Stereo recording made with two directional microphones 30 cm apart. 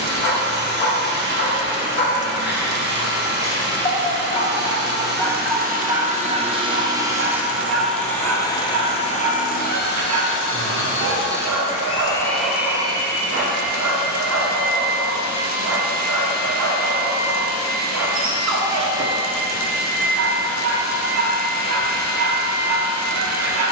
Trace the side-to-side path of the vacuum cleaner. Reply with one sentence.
You can hear the vacuum cleaner move from right to left and back again.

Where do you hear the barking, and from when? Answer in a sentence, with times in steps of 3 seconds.
In this clip you hear the barking on the left from 0 s, in the centre from 3 s and on the right from 6 s.